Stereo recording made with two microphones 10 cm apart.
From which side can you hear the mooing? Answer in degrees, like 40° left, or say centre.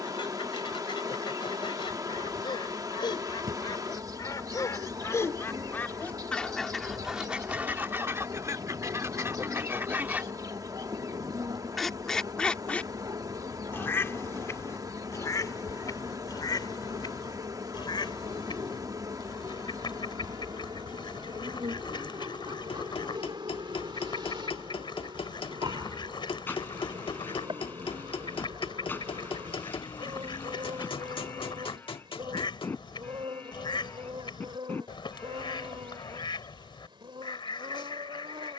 20° left.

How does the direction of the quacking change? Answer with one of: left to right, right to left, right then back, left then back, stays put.
right then back.